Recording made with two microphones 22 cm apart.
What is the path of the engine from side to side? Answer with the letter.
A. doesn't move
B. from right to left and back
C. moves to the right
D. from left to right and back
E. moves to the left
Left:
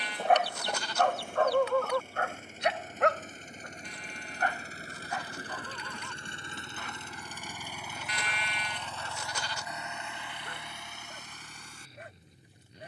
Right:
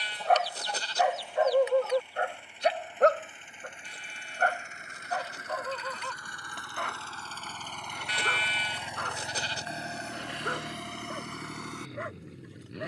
C.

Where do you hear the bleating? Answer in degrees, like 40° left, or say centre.
30° right.